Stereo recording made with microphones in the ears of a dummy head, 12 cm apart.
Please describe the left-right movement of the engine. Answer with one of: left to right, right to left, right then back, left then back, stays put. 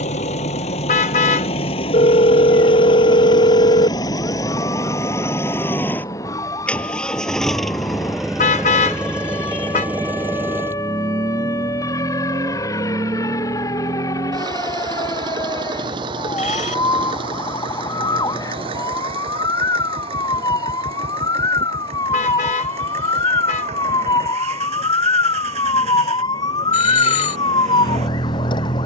left to right.